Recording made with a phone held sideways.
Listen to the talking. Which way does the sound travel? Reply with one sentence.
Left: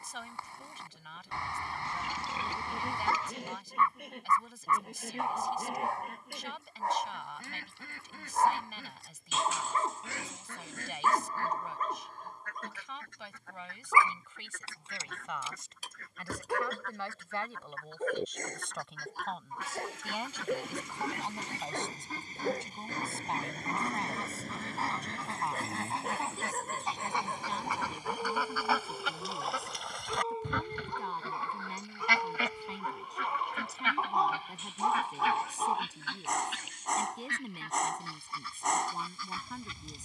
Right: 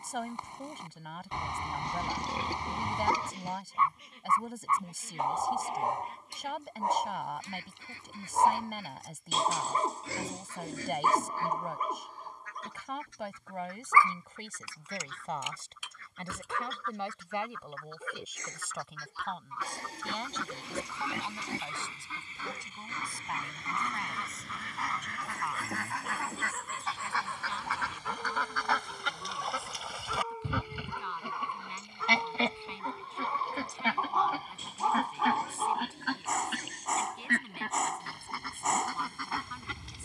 You can hear the talking move to the left.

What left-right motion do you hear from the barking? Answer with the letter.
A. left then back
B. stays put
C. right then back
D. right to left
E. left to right
A.